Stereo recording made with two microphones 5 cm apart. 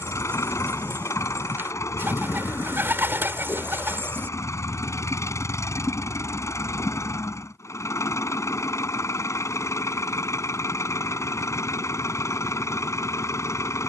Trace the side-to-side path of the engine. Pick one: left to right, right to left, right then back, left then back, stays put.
stays put.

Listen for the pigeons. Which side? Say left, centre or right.
right.